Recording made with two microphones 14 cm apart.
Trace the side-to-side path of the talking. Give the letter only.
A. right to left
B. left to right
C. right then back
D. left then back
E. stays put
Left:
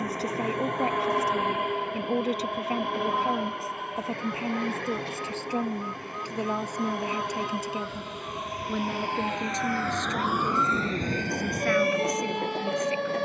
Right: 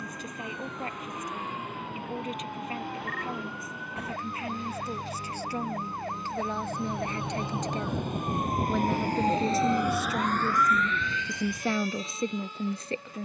B.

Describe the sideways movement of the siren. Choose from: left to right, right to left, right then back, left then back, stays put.
right to left.